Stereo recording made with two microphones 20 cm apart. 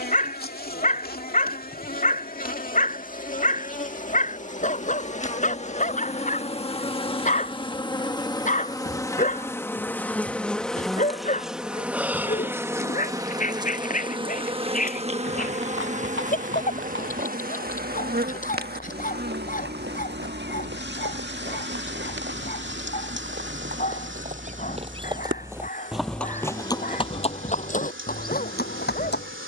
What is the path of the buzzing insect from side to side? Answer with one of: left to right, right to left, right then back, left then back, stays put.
left to right.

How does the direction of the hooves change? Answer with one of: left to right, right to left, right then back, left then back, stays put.
right to left.